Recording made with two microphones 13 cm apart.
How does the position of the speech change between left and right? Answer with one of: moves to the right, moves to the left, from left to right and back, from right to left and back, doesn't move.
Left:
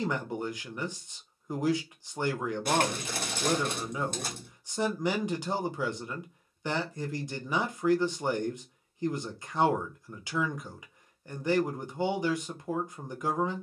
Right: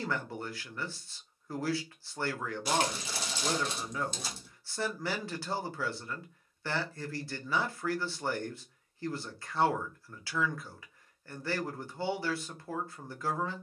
doesn't move.